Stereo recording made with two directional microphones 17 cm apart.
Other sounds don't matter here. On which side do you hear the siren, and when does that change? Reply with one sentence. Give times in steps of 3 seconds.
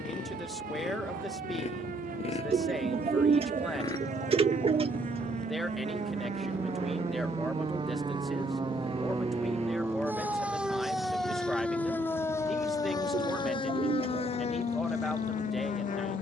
You can hear the siren on the right from 0 s, in the centre from 9 s and on the left from 12 s.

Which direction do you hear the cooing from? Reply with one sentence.
In this clip you hear the cooing on the right.